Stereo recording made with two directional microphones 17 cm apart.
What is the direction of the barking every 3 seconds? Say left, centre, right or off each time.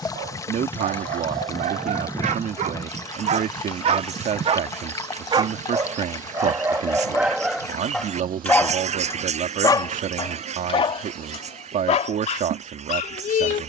right, right, centre, left, left.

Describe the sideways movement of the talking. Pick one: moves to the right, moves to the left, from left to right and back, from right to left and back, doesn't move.
doesn't move.